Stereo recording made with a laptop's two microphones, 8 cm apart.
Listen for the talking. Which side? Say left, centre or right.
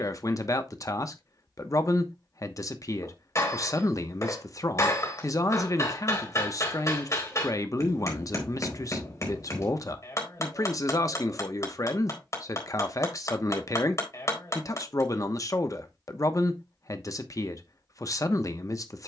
left.